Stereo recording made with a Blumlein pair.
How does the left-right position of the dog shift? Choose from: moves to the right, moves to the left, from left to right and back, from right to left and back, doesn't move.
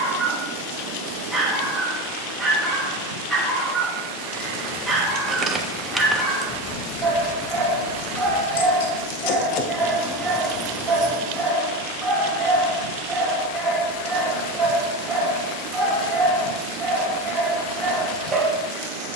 doesn't move.